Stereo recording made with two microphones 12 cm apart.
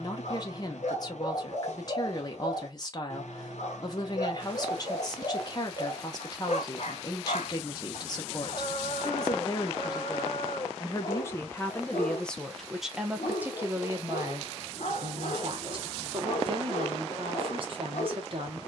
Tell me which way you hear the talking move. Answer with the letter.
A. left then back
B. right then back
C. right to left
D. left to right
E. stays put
D.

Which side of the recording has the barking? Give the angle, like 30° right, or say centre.
70° left.